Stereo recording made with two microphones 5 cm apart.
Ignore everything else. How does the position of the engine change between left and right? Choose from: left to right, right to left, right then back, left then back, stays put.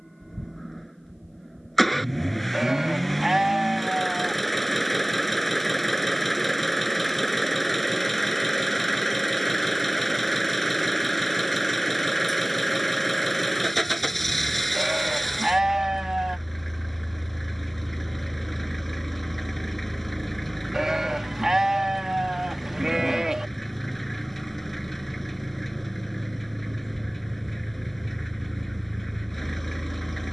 stays put.